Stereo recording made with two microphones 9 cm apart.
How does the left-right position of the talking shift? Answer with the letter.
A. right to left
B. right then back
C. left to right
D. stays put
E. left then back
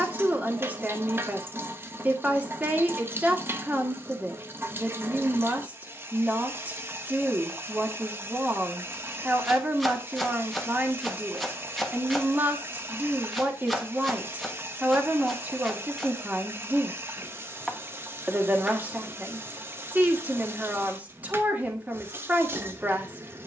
D.